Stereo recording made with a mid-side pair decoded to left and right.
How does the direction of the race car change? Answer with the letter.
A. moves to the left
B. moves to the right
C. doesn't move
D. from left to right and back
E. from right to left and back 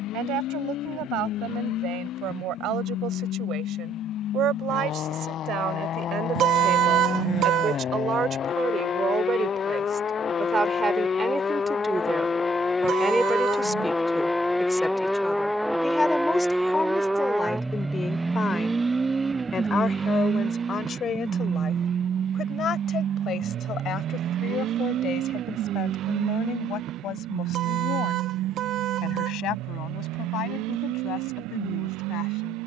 B.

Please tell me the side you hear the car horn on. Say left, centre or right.
right.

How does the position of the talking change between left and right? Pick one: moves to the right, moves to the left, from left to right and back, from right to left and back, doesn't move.
moves to the left.